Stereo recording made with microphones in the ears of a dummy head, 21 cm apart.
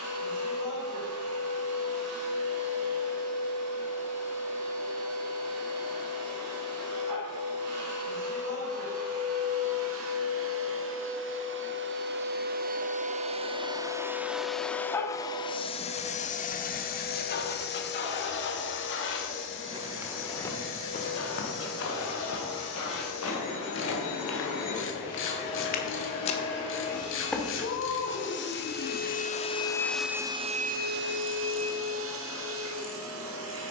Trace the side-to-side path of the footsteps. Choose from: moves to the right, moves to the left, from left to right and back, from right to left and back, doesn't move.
from right to left and back.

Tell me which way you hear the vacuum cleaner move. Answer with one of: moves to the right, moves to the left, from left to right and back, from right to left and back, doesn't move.
from right to left and back.